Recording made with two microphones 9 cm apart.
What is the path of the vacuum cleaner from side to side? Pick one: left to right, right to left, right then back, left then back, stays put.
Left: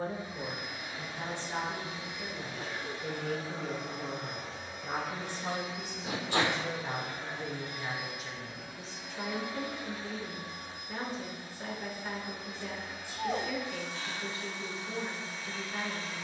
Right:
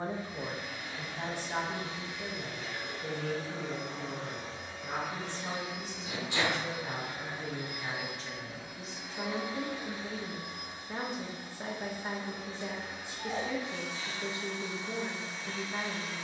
left to right.